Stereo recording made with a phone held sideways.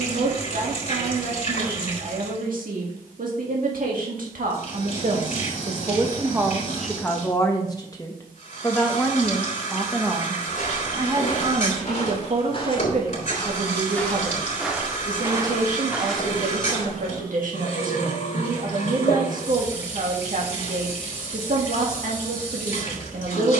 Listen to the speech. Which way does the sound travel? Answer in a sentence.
In this clip you hear the speech move from right to left and back again.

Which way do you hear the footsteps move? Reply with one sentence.
You can hear the footsteps move from left to right and back again.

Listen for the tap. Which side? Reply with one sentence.
You can hear the tap on the left.